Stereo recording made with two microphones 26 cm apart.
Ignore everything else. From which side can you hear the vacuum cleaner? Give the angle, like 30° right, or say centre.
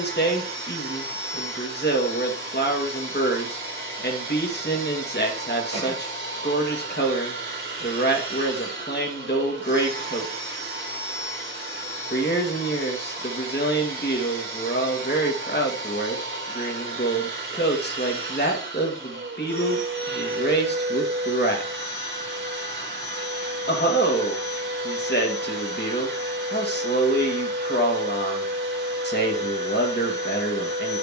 50° right.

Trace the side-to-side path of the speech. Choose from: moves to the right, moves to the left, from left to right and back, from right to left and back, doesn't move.
doesn't move.